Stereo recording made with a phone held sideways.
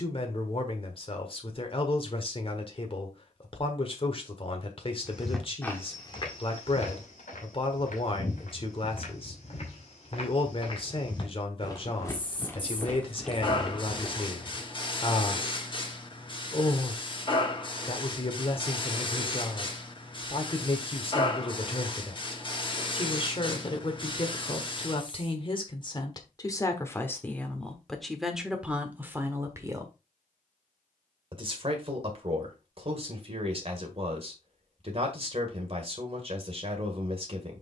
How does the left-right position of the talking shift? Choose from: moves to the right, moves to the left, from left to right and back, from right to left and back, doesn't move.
moves to the right.